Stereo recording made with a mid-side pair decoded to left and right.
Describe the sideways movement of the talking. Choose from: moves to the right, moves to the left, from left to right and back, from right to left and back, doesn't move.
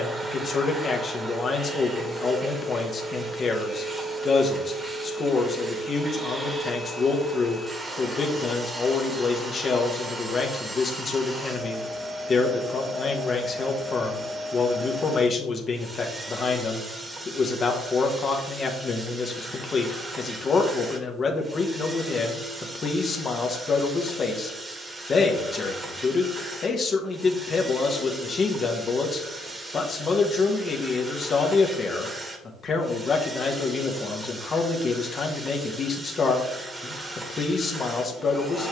doesn't move.